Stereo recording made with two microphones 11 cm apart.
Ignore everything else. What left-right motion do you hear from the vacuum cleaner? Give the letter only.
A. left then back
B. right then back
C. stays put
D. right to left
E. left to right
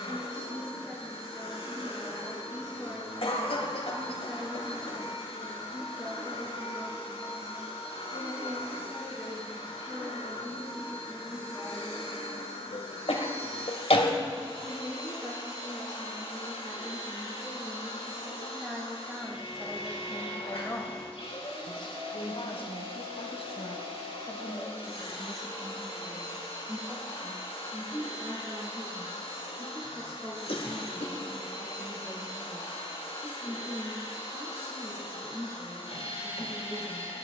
C.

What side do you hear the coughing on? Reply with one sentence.
You can hear the coughing on the left.